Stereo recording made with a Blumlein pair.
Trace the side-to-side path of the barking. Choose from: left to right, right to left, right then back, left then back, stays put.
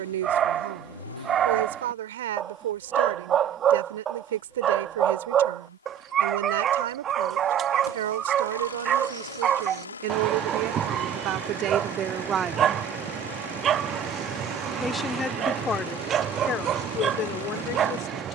stays put.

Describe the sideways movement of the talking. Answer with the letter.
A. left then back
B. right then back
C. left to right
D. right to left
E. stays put
D.